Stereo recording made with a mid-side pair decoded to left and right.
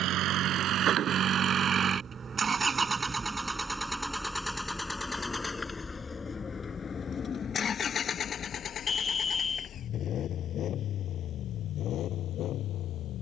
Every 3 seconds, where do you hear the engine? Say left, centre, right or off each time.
right, centre, left, left, left.